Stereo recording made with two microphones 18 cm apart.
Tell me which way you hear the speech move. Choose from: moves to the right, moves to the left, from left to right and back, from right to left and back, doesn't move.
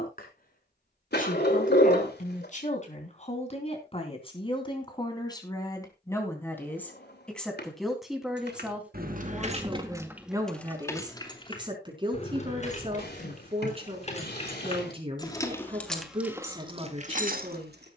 moves to the right.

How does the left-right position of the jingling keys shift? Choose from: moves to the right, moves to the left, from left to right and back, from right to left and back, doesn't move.
from right to left and back.